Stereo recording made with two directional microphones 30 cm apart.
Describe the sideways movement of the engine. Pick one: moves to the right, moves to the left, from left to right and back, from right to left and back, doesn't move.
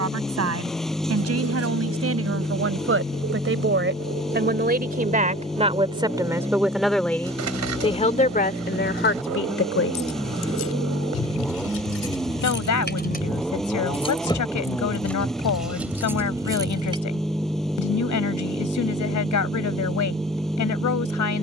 doesn't move.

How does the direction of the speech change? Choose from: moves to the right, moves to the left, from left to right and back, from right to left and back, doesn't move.
moves to the left.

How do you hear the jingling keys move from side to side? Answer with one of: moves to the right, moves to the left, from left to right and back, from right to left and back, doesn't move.
moves to the right.